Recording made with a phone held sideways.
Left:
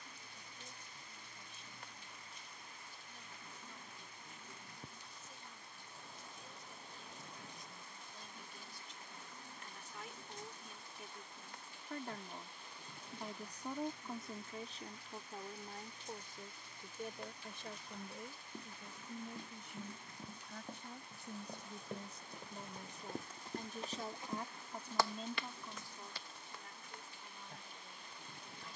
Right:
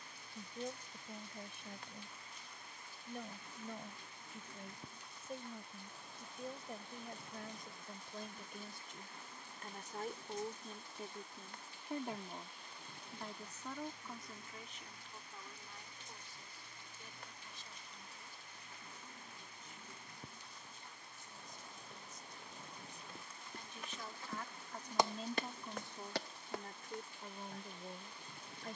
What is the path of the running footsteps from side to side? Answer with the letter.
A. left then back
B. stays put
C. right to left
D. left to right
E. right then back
D.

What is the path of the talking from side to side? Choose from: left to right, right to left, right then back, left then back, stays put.
left then back.